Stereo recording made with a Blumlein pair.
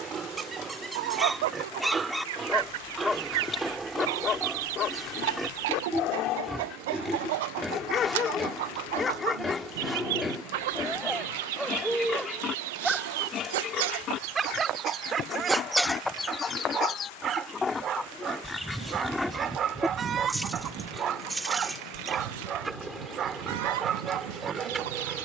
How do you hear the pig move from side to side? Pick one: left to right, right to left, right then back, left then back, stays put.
left then back.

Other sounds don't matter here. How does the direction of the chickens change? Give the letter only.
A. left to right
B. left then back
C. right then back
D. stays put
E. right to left
B.